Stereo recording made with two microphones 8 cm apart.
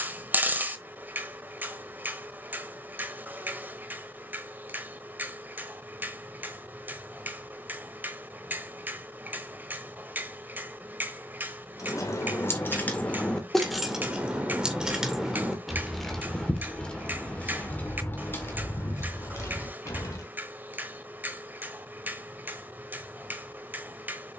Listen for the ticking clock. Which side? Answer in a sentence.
You can hear the ticking clock on the right.